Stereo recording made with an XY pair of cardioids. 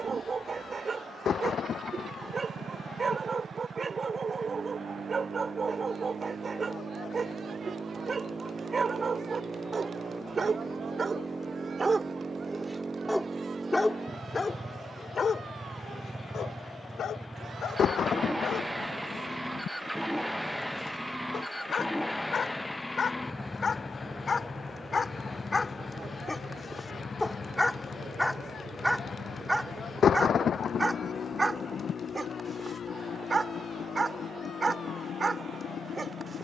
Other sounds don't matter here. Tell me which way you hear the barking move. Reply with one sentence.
In this clip you hear the barking move from right to left and back again.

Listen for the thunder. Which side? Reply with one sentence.
In this clip you hear the thunder on the left.